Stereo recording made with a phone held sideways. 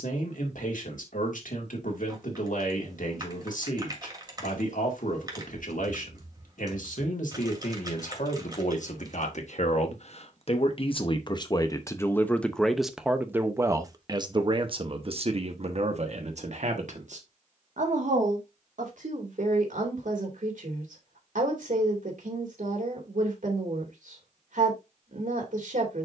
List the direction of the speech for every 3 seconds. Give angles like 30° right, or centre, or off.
70° left, 70° left, 70° left, 40° left, 20° right, 50° right, 70° right, 70° right, 70° right.